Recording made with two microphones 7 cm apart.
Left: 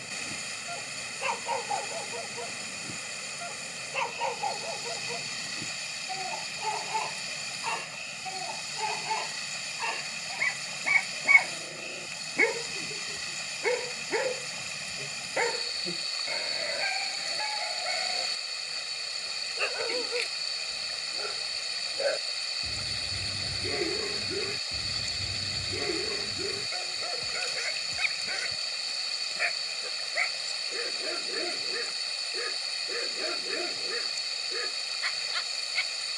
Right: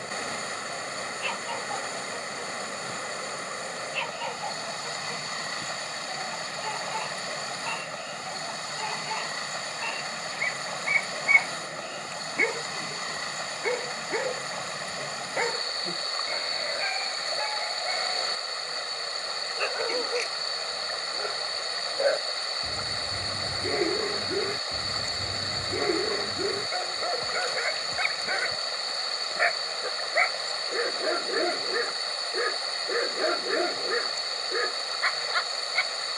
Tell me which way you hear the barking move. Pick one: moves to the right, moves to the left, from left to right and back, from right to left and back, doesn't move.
moves to the right.